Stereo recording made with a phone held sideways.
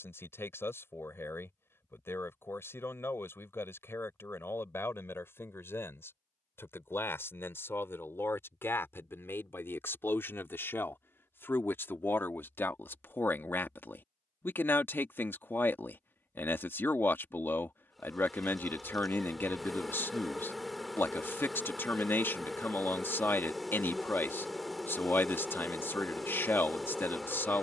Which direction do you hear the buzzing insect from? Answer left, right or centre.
centre.